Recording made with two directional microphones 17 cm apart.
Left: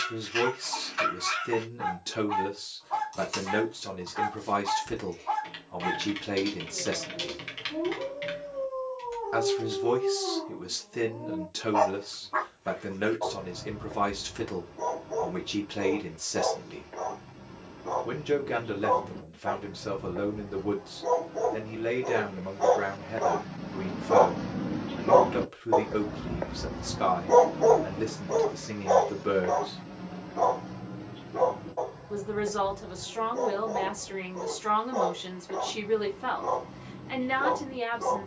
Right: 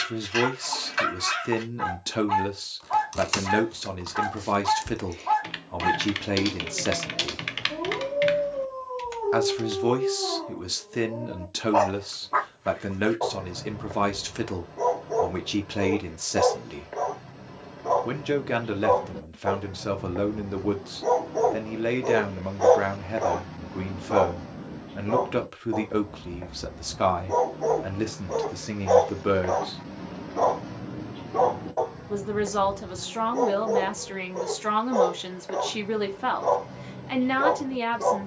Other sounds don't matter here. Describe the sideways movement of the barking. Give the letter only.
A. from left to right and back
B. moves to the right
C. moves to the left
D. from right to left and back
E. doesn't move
D.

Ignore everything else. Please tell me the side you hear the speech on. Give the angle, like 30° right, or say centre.
30° right.